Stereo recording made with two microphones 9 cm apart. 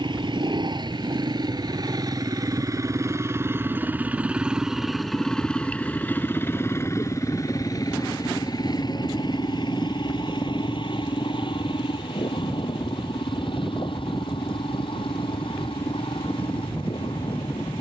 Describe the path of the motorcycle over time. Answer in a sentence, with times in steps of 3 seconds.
You can hear the motorcycle on the right from 0 s, in the centre from 3 s and on the left from 6 s.